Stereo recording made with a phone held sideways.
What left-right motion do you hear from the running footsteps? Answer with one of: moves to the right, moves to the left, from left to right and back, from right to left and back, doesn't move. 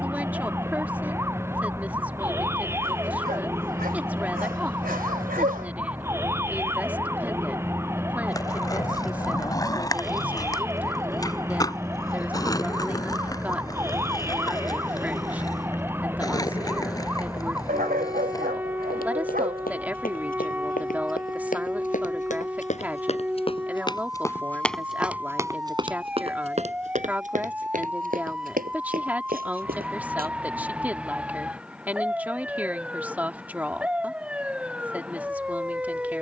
moves to the right.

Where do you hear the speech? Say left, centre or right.
centre.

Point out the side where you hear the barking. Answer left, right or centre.
right.